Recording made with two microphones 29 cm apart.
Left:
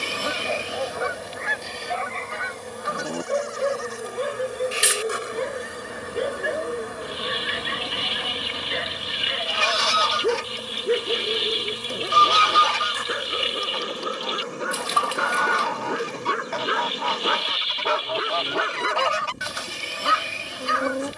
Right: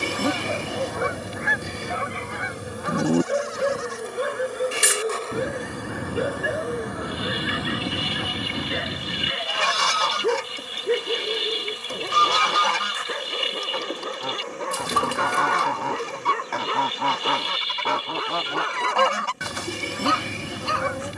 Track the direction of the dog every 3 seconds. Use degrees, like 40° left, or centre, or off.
20° right, 10° right, centre, centre, 10° left, 20° left, 20° left.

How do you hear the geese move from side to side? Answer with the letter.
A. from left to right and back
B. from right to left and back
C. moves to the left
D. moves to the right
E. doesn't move
E.